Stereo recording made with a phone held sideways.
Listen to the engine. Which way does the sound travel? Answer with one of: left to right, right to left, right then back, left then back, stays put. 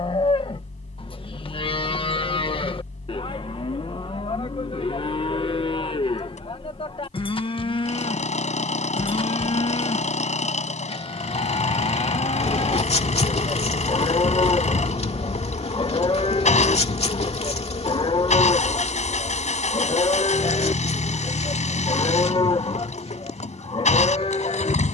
stays put.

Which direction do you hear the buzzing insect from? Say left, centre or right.
left.